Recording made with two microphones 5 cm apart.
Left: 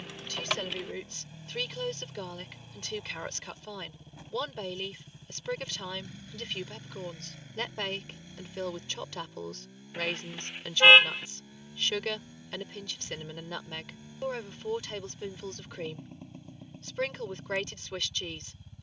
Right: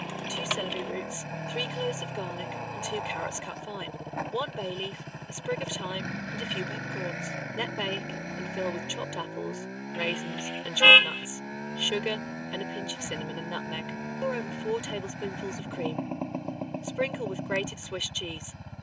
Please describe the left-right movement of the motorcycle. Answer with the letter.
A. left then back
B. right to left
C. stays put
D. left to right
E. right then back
C.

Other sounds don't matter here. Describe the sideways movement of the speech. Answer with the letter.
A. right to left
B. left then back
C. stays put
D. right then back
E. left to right
C.